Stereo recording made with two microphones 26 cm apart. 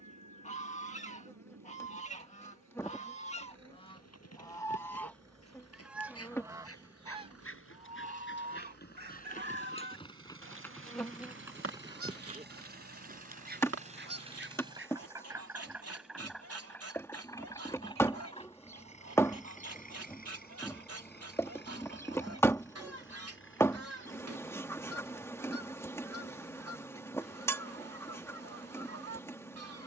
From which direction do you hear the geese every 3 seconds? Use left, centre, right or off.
left, centre, right, right, right, right, right, right, right, right.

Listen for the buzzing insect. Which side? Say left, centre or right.
centre.